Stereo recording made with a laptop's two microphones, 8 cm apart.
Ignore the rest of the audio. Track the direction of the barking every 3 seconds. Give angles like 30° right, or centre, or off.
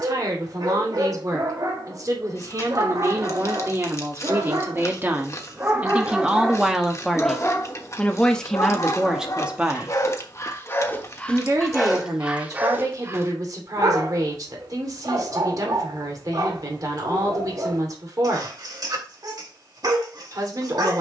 60° right, 40° right, 30° left, 30° left, 40° right, 50° right, 50° right.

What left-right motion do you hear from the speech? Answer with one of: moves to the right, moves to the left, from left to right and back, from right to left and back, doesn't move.
from right to left and back.